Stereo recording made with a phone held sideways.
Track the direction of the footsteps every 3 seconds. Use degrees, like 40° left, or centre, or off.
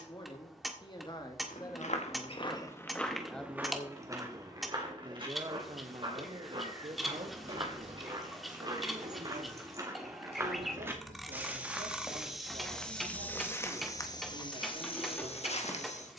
50° left, 30° right, 40° right, 20° right, 20° left, 50° left.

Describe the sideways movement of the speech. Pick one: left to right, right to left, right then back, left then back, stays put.
left to right.